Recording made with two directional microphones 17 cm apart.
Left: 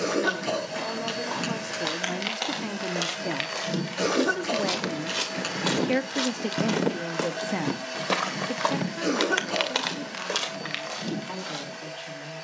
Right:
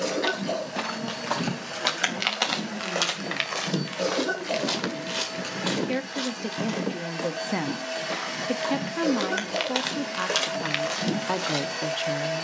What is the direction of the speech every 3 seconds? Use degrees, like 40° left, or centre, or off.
50° left, 40° left, centre, 50° right.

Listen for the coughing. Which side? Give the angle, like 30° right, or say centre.
40° left.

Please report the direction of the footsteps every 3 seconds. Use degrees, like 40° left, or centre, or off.
40° right, 10° right, 40° left, 10° right.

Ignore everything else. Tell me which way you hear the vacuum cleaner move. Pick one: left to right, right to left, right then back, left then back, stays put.
left to right.